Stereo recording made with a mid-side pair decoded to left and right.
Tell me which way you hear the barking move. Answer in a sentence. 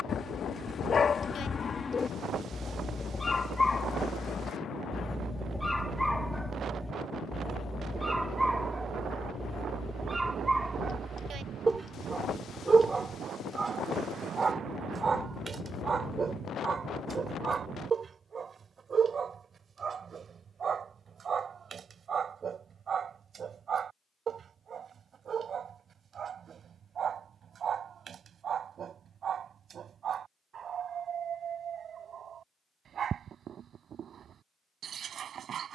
You can hear the barking move from left to right.